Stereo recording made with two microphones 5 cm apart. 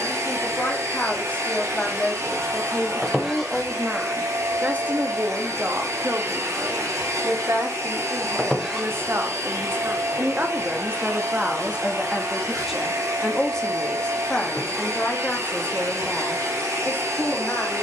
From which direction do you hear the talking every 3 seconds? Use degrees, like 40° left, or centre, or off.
20° left, 20° right, 60° right, 30° right, 10° left, 30° left.